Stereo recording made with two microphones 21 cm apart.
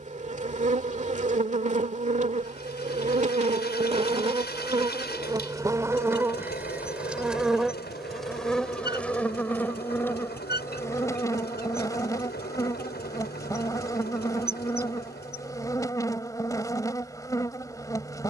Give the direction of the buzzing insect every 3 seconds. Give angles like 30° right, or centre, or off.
40° right, 30° right, centre, 10° left, 20° left, 20° left.